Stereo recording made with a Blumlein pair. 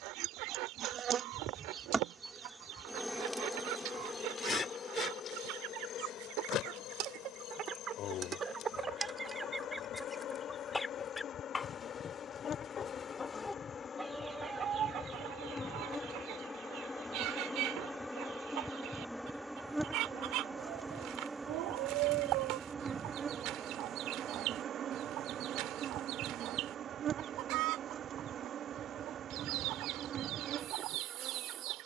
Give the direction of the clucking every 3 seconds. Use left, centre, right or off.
right, right, right, centre, centre, right, right, right, right, right, right.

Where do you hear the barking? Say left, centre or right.
right.